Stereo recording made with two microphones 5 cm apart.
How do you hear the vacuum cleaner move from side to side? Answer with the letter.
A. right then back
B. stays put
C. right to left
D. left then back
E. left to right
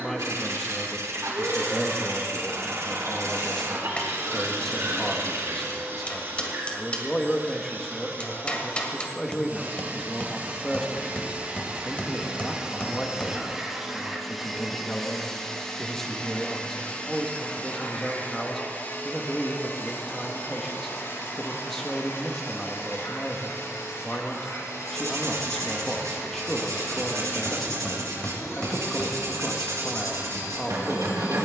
C.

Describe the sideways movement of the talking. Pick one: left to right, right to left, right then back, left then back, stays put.
stays put.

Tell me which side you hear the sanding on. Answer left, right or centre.
right.